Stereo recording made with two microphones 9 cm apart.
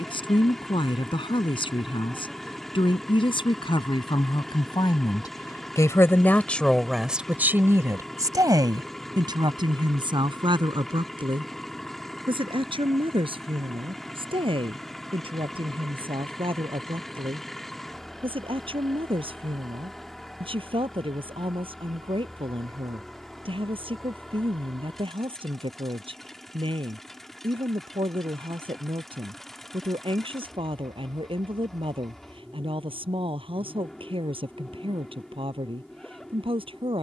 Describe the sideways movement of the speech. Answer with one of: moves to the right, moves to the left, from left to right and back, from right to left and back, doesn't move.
moves to the right.